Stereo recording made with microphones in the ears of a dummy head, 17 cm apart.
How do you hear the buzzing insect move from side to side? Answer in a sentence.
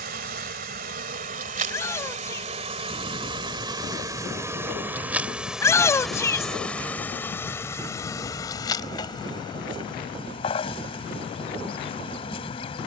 You can hear the buzzing insect travel towards the left.